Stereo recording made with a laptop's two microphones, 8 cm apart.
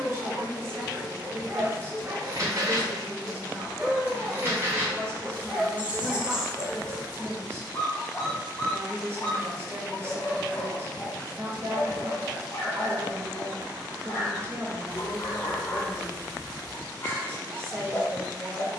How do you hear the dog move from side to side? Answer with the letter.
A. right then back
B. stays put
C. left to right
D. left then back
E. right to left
E.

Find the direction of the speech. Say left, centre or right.
right.